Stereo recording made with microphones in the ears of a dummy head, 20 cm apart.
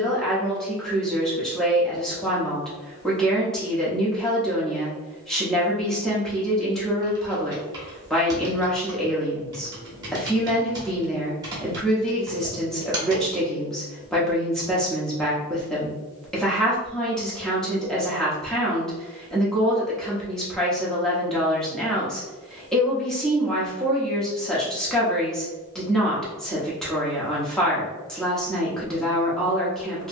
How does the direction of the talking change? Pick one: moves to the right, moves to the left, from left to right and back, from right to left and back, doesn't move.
doesn't move.